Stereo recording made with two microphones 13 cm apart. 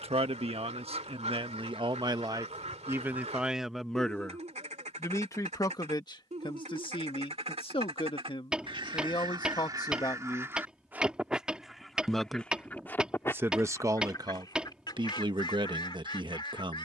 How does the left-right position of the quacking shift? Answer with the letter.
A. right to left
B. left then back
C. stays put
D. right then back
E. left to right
A.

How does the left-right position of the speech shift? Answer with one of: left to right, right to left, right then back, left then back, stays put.
left then back.